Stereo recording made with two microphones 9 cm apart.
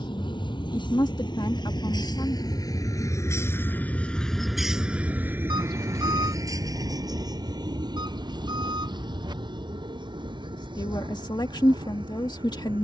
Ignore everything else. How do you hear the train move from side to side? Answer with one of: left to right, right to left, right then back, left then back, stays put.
left to right.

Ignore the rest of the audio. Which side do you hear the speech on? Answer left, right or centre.
left.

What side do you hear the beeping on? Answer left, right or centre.
right.